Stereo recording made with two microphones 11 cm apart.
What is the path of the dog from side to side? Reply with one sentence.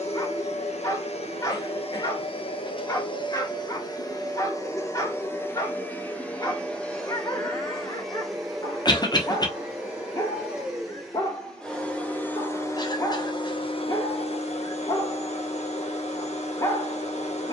In this clip you hear the dog stay in one place.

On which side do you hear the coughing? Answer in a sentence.
You can hear the coughing on the left.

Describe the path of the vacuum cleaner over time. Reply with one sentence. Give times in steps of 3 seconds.
In this clip you hear the vacuum cleaner on the left from 0 s, in the centre from 6 s and on the left from 12 s.